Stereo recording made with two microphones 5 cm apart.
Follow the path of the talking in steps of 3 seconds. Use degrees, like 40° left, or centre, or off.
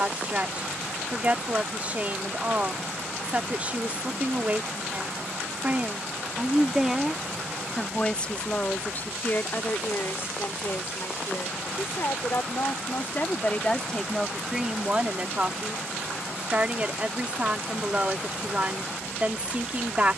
30° right, 30° right, 10° left, 50° left, 20° left, 30° right, 30° right.